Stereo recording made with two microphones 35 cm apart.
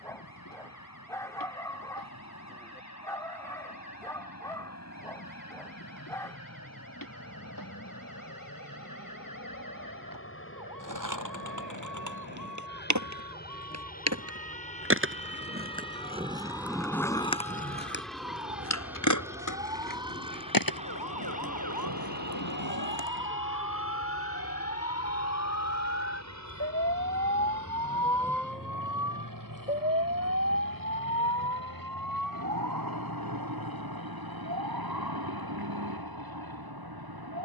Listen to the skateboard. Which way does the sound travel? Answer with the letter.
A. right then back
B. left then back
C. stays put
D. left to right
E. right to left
E.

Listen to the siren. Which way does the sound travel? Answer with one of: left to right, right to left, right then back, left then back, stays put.
left to right.